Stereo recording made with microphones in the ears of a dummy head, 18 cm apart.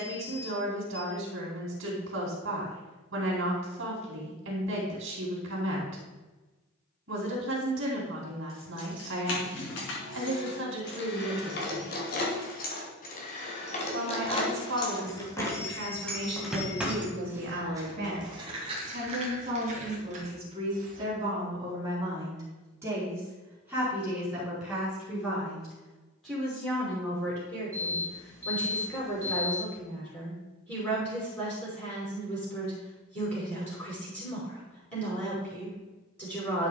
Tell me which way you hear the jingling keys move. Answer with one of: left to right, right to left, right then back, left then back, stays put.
left to right.